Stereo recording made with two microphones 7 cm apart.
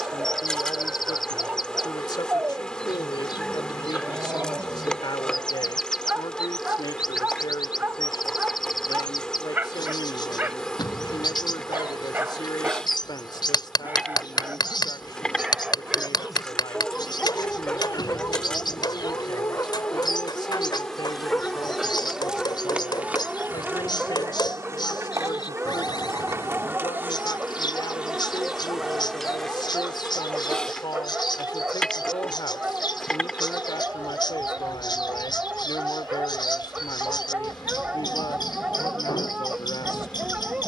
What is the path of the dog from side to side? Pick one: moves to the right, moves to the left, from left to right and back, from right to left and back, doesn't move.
from right to left and back.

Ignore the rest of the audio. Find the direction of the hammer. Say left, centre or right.
left.